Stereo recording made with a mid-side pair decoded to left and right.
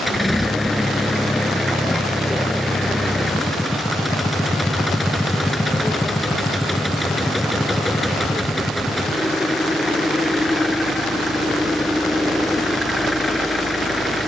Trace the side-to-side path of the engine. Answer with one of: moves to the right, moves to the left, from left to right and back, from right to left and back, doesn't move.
doesn't move.